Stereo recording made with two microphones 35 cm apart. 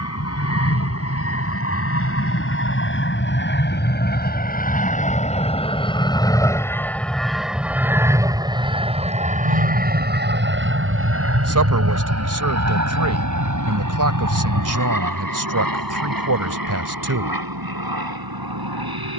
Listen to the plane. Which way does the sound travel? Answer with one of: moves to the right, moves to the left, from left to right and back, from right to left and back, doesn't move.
moves to the right.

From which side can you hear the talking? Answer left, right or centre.
right.